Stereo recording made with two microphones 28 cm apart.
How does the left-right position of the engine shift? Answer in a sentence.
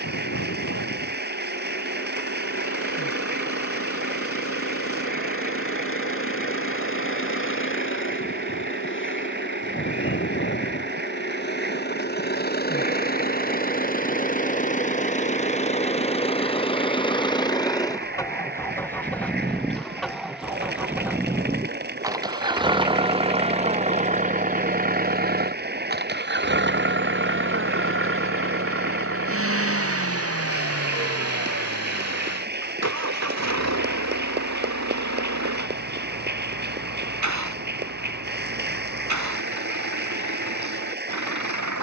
In this clip you hear the engine travel towards the right.